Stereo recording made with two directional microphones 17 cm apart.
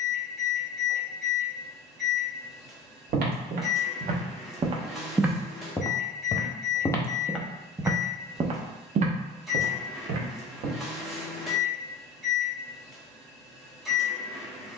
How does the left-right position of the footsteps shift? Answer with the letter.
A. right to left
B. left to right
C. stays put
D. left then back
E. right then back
D.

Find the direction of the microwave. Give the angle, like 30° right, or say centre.
centre.